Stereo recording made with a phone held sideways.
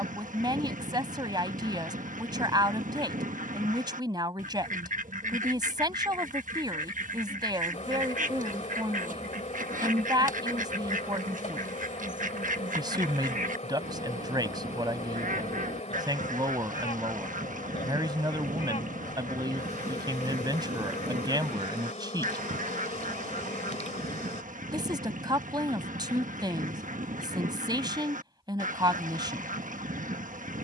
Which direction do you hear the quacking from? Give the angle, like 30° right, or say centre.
60° right.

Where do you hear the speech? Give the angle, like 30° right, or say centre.
30° right.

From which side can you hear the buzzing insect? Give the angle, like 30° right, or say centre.
50° left.